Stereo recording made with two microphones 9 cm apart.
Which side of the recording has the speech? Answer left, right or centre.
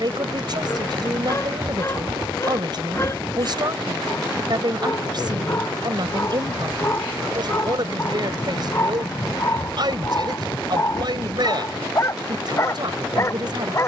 right.